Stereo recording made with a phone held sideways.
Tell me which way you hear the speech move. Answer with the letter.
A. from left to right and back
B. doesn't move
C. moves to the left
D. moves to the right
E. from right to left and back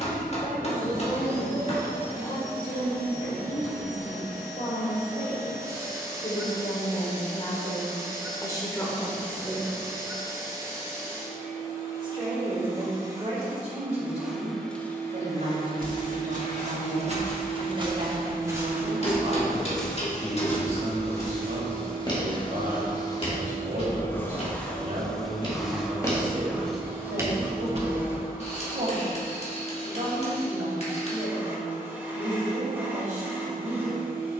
D.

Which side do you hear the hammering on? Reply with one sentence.
You can hear the hammering on the left.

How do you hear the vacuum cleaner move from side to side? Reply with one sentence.
In this clip you hear the vacuum cleaner move from right to left and back again.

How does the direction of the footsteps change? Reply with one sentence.
In this clip you hear the footsteps go left and come back.